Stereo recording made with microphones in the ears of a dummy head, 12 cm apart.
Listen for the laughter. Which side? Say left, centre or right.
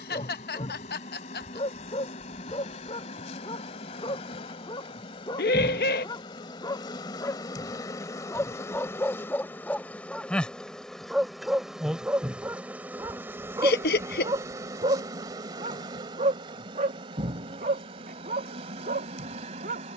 left.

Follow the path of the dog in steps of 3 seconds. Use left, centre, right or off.
left, left, left, centre, right, right, right.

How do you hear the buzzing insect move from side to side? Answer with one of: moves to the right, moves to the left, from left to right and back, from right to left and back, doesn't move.
moves to the right.